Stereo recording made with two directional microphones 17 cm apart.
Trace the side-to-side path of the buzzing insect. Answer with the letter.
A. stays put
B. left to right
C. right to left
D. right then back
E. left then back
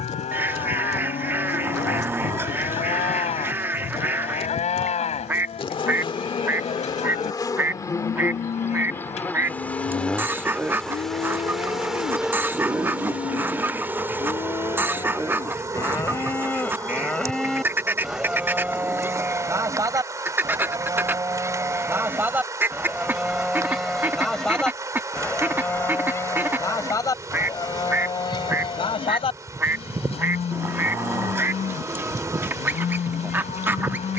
B.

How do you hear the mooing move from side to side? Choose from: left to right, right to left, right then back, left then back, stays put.
right then back.